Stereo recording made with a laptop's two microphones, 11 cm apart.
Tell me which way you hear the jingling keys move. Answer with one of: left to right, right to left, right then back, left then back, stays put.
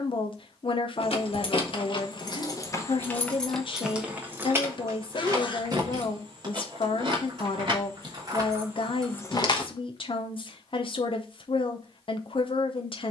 right then back.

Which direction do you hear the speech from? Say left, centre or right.
left.